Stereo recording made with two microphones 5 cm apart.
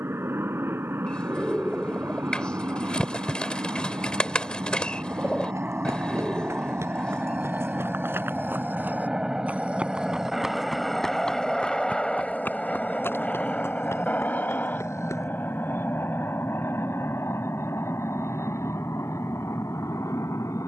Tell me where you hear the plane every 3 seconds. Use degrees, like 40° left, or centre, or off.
50° right, 40° right, 30° right, centre, 20° left, 40° left, 50° left.